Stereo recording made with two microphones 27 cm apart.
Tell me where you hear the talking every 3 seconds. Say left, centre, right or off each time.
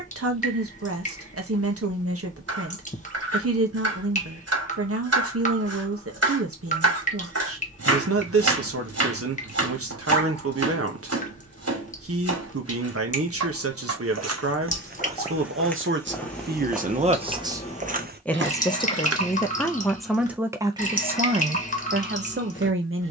right, right, right, right, right, right, centre, right.